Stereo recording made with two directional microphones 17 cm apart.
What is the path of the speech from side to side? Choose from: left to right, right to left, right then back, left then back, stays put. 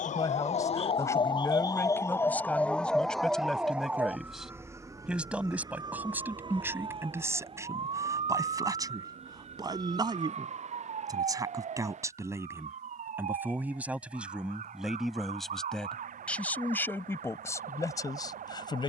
right then back.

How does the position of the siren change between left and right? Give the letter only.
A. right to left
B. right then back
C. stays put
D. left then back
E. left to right
E.